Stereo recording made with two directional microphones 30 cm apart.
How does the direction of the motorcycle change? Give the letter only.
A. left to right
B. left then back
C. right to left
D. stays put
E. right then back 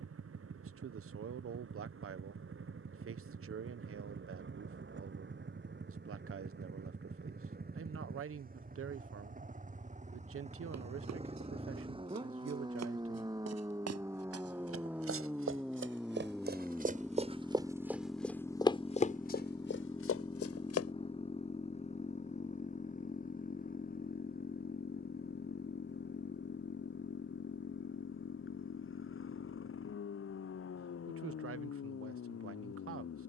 C.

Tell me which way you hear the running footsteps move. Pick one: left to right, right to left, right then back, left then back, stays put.
right to left.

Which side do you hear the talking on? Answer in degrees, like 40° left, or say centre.
50° right.